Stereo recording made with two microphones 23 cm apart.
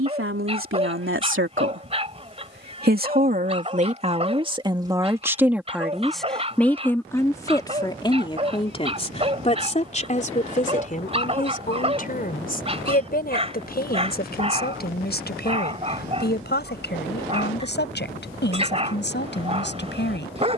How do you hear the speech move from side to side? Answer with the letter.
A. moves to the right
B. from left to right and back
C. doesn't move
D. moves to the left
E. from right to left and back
D.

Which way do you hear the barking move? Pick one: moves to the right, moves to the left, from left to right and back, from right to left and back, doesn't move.
doesn't move.